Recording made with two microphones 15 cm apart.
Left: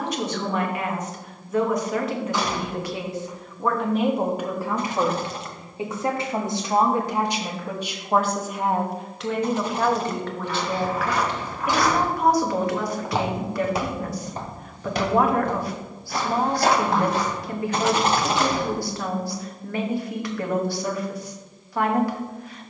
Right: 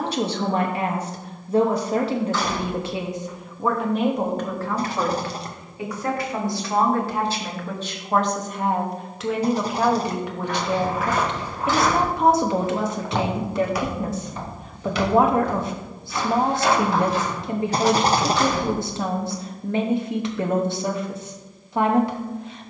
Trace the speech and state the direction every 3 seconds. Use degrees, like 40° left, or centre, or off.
30° right, 10° left, 10° left, 10° right, 20° right, 20° right, 20° right, 20° right.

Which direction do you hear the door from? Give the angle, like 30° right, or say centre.
10° left.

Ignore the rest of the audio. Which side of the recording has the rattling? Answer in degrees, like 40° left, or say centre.
30° right.